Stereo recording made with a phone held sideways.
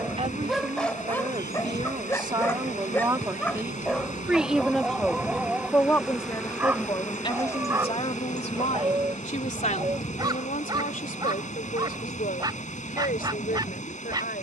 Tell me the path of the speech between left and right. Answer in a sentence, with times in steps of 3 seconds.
In this clip you hear the speech on the right from 0 s, in the centre from 3 s and on the left from 6 s.